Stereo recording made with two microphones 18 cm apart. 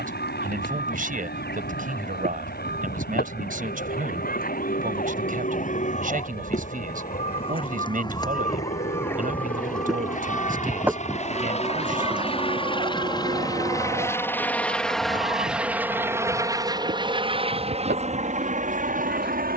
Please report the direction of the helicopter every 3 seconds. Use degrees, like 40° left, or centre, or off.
70° left, 60° left, 60° left, 40° left, 20° left, 20° right, 40° right.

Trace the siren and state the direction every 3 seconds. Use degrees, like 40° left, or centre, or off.
60° left, 50° left, 30° left, centre, 30° right, 50° right, 60° right.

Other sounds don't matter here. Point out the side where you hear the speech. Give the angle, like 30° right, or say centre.
50° right.